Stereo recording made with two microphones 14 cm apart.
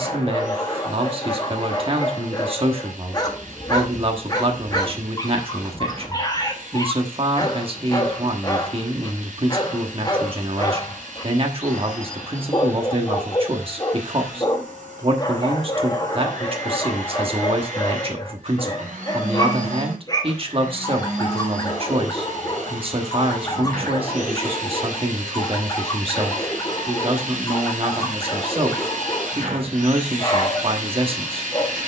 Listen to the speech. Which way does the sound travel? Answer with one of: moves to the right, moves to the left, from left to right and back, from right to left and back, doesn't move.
doesn't move.